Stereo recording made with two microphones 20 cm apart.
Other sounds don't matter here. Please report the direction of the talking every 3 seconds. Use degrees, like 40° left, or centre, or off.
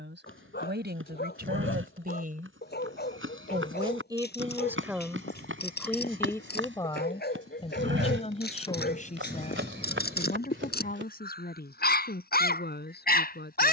50° right, 10° right, 20° left, 40° left, 50° left.